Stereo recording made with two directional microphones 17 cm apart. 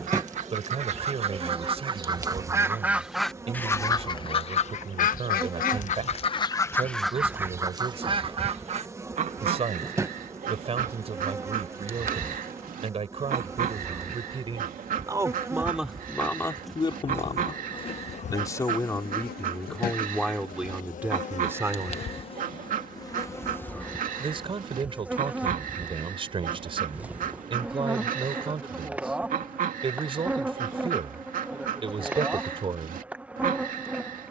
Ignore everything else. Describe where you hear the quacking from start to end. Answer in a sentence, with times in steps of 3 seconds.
In this clip you hear the quacking on the right from 0 s, on the left from 3 s, in the centre from 6 s and on the right from 9 s.